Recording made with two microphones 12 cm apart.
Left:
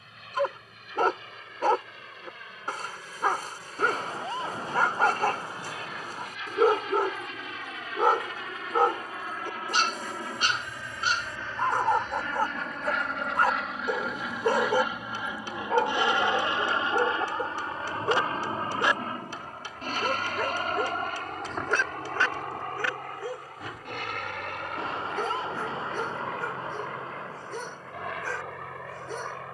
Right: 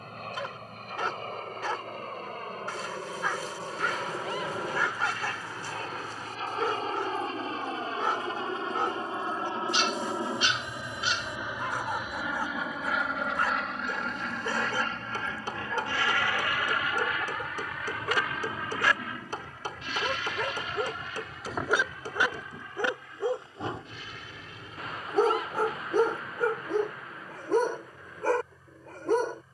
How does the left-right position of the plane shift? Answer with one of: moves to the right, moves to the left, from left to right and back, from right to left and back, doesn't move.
moves to the left.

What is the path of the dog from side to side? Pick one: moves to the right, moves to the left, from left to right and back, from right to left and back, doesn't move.
moves to the right.